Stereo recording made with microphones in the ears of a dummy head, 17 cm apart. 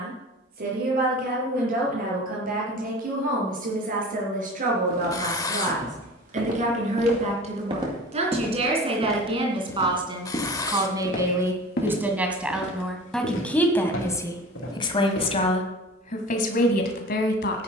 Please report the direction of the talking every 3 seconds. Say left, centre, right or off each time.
right, right, right, right, centre, left.